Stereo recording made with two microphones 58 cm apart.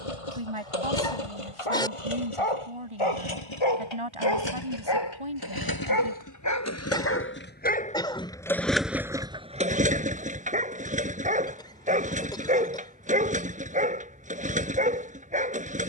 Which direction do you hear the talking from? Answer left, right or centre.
right.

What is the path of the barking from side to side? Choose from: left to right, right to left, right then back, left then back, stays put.
left to right.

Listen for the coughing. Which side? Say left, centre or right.
centre.